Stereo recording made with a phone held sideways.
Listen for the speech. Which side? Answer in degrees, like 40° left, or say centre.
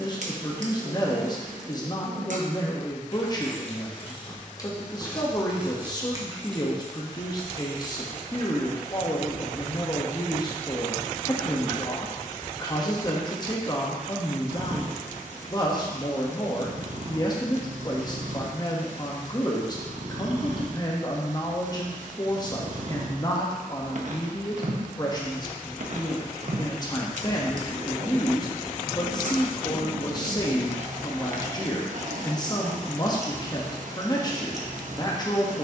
30° left.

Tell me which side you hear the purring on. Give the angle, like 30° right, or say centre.
60° right.